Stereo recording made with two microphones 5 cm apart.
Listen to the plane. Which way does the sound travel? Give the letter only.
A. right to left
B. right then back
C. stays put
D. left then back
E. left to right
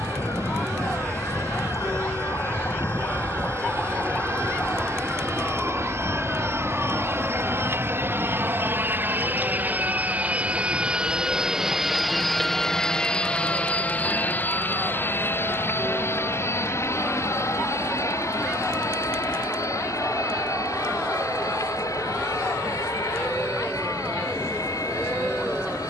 A.